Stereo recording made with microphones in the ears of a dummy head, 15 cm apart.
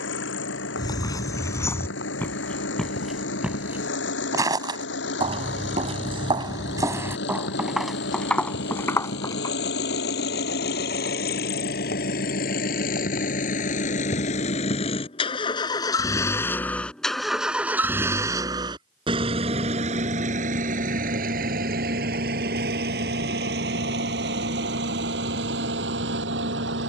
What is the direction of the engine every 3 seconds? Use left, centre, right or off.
left, left, left, left, left, centre, right, right, right.